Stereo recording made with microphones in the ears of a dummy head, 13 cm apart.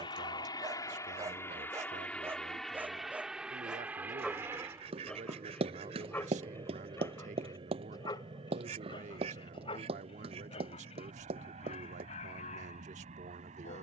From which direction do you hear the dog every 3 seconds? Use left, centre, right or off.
right, centre, left, left, left.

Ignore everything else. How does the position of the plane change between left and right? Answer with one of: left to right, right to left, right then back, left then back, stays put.
left to right.